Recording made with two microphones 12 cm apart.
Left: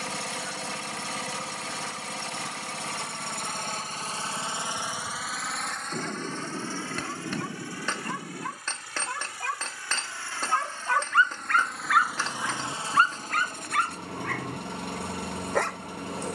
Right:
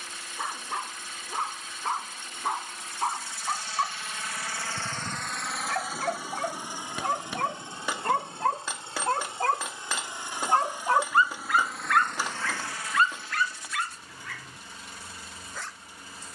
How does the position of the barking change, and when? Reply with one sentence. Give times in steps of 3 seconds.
In this clip you hear the barking on the right from 0 s and on the left from 12 s.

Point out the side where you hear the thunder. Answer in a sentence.
In this clip you hear the thunder on the left.